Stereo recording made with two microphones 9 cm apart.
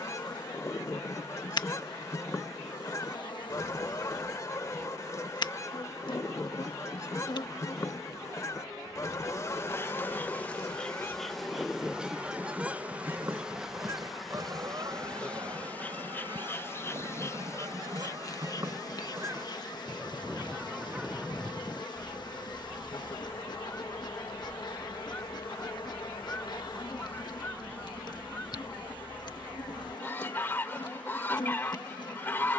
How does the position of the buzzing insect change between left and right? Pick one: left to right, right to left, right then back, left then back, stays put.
right then back.